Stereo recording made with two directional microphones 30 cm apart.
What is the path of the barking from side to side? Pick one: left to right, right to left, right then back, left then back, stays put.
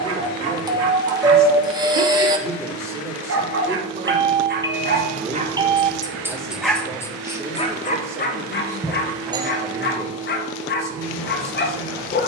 right to left.